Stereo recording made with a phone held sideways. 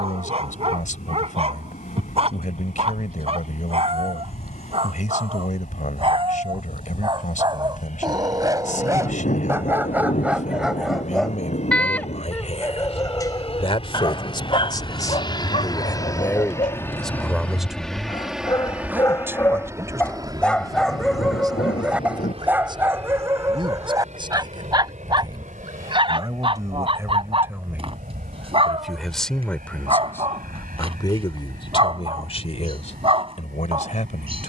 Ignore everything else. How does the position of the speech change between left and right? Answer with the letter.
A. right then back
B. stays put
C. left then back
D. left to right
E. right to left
A.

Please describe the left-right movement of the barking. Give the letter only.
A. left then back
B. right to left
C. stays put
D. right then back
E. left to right
A.